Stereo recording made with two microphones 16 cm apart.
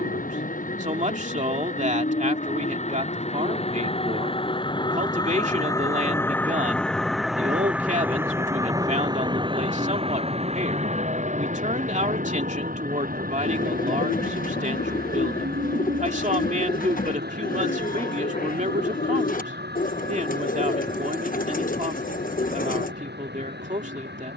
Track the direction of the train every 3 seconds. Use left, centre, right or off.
left, left, centre, right, right, right, right, right.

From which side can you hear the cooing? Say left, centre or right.
left.